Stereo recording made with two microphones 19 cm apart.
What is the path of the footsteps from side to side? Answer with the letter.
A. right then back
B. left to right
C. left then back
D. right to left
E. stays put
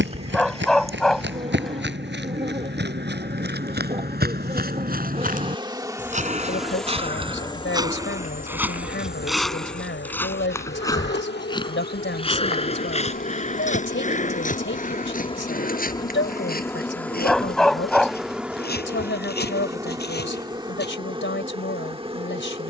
D.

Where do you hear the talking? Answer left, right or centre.
left.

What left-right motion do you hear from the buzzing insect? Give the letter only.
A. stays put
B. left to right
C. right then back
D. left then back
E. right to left
D.